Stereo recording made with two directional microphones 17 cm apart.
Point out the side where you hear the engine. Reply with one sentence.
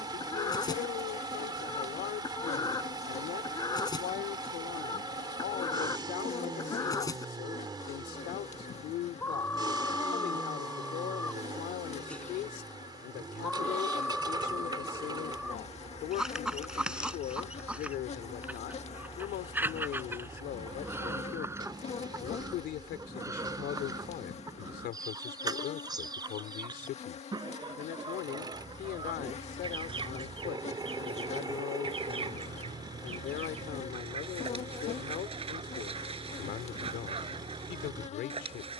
You can hear the engine on the right.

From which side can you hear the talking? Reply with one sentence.
In this clip you hear the talking on the left.